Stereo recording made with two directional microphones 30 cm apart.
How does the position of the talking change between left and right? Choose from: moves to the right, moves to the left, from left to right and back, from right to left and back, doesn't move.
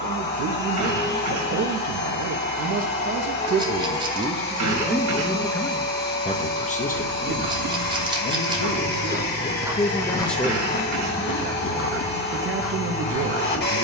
from right to left and back.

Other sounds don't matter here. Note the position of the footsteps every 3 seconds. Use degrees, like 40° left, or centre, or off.
off, off, 50° right, 10° left, 60° left.